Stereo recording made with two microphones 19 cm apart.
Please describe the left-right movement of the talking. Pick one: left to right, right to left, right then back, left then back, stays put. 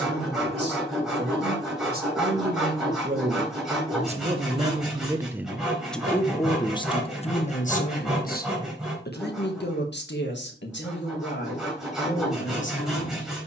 right to left.